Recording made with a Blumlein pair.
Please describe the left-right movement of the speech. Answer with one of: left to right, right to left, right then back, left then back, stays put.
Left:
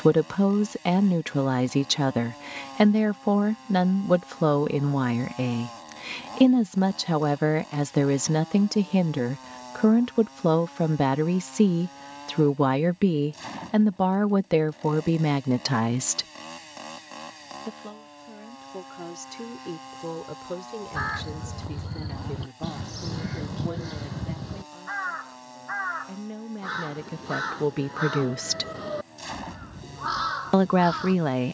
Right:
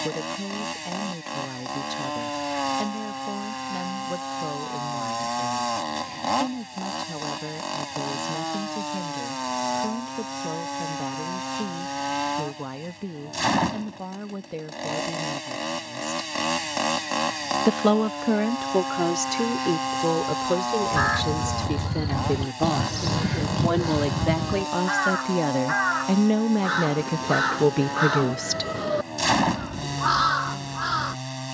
right then back.